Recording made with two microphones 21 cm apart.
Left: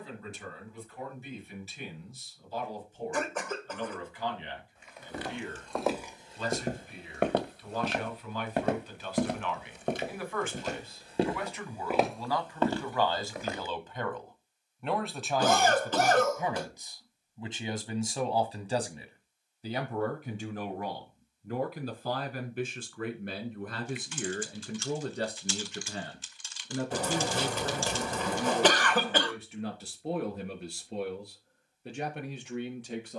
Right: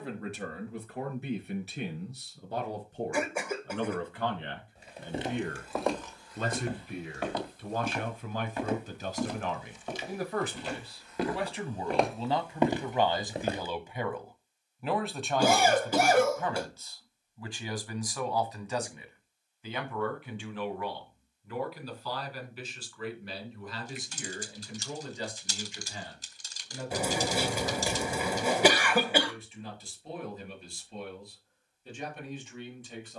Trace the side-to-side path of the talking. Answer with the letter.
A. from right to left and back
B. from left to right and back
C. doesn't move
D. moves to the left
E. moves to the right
D.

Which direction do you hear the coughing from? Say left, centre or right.
centre.